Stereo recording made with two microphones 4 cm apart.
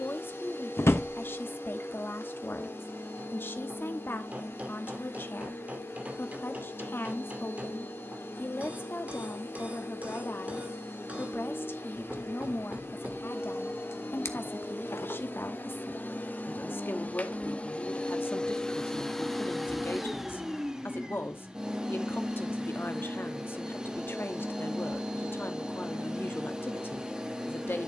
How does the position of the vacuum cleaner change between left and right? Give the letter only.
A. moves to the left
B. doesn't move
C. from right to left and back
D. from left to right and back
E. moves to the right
E.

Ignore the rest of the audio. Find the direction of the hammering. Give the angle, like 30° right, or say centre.
40° right.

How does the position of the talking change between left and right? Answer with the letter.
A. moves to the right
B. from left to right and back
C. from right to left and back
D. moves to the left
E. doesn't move
E.